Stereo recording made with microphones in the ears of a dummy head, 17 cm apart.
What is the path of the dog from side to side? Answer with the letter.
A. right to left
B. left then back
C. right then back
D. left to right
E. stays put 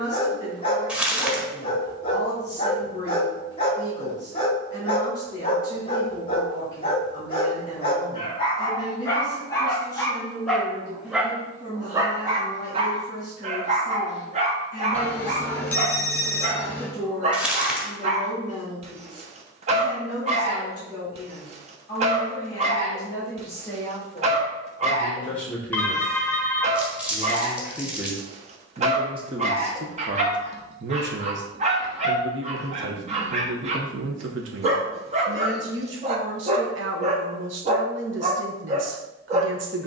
D.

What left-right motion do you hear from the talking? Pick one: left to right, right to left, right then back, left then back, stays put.
left to right.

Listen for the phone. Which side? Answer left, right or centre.
centre.